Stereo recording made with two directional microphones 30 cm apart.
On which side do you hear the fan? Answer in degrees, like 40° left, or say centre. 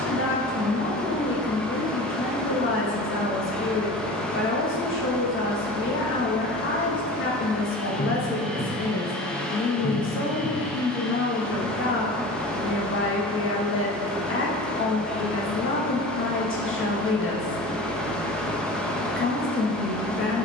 centre.